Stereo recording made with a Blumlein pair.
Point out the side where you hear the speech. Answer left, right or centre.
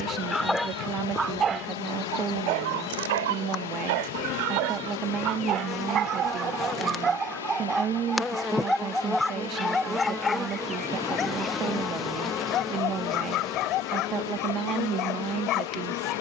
right.